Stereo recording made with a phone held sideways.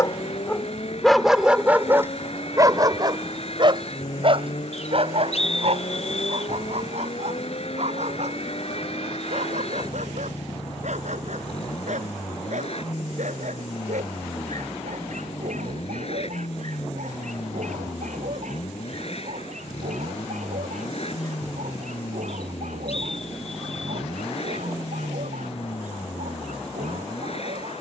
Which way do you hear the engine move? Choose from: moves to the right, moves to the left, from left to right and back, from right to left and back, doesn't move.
doesn't move.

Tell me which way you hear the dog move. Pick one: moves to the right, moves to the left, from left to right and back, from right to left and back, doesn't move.
moves to the right.